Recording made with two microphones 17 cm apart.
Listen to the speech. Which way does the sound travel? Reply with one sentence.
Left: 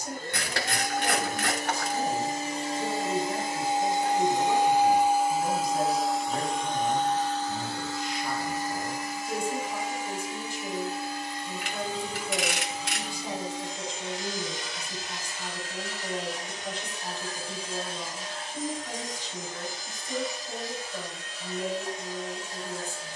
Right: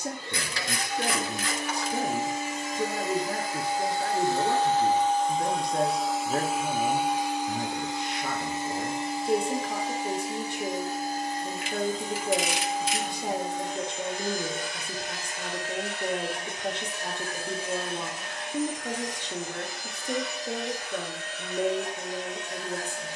You can hear the speech stay in one place.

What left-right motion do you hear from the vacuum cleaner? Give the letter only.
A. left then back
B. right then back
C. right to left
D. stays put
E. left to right
E.